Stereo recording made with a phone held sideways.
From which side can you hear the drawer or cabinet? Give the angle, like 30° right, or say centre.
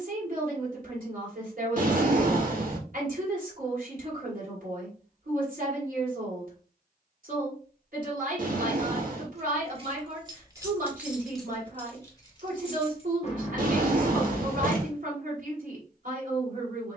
60° right.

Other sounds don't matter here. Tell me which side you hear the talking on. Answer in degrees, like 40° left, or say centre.
60° right.